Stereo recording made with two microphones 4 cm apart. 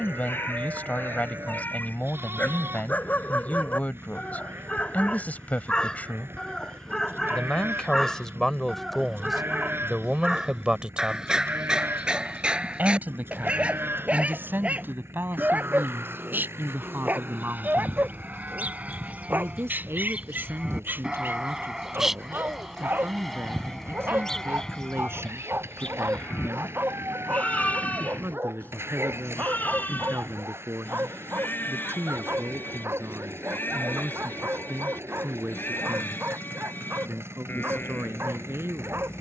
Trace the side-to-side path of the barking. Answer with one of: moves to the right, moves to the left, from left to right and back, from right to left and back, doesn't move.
moves to the right.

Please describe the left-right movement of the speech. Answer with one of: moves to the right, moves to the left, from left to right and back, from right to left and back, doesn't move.
moves to the right.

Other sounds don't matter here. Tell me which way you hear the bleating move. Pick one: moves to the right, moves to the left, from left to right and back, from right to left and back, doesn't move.
moves to the left.